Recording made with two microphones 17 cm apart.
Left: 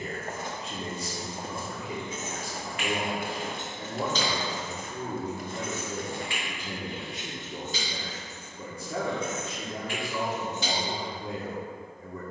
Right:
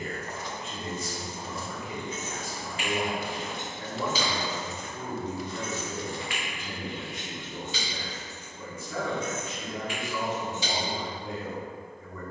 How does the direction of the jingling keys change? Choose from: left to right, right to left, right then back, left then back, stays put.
right to left.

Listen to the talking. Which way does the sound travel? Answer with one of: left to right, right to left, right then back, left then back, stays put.
stays put.